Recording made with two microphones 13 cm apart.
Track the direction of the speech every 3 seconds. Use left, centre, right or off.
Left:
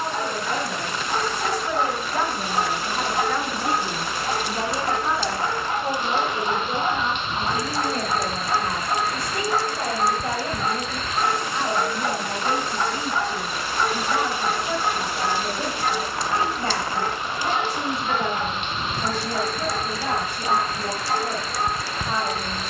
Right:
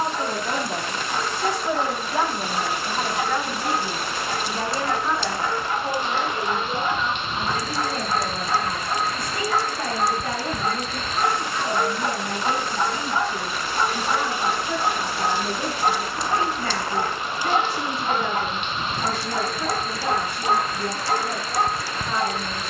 right, centre, left, left, left, left, left, left.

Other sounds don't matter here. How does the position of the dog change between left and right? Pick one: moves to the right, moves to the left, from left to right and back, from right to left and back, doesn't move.
moves to the right.